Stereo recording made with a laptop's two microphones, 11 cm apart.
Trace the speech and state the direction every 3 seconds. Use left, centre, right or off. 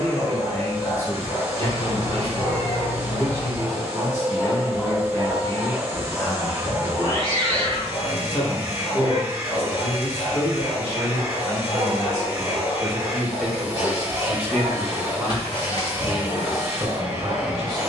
left, left, left, left, centre, right.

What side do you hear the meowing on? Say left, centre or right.
left.